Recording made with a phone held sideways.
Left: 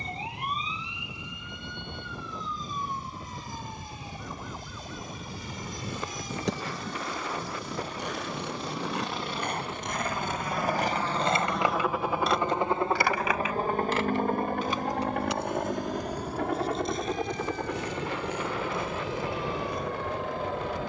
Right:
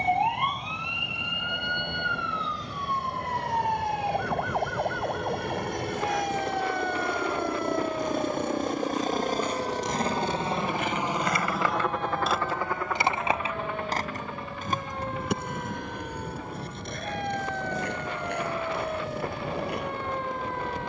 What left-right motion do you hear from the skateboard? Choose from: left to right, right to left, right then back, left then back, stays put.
left to right.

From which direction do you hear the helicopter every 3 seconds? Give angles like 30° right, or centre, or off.
80° right, 70° right, 60° right, 20° right, 30° left, 60° left, 70° left.